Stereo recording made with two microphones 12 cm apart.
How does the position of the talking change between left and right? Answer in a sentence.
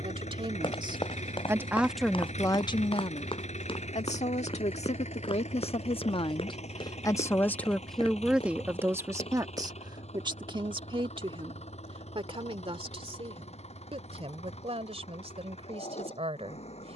In this clip you hear the talking move from right to left and back again.